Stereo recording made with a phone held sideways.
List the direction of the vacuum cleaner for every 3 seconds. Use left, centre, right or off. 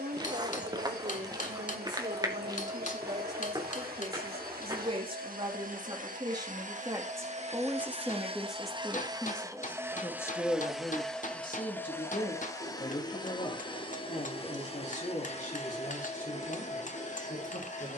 right, right, right, centre, left, left.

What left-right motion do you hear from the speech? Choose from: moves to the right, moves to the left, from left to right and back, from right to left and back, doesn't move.
moves to the left.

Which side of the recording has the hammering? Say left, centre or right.
left.